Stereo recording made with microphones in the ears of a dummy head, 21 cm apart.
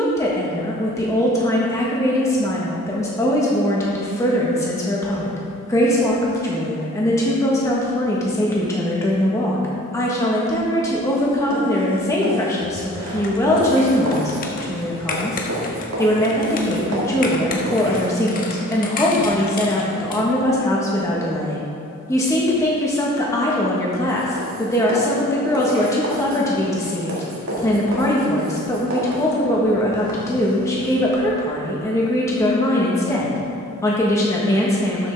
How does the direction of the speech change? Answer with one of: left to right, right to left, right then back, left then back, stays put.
stays put.